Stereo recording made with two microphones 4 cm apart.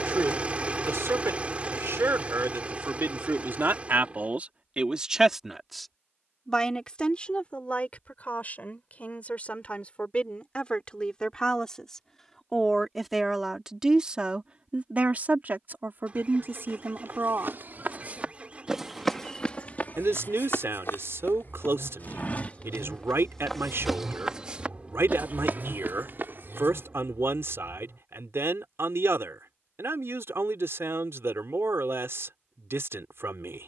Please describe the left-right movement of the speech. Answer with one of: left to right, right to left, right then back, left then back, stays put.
left then back.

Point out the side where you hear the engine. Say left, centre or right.
right.